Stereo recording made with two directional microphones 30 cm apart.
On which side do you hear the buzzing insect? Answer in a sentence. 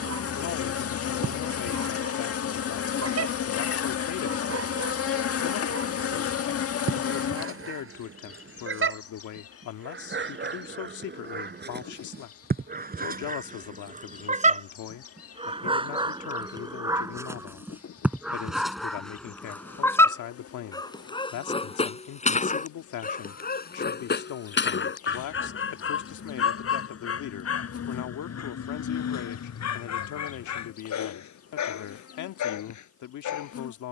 In this clip you hear the buzzing insect on the left.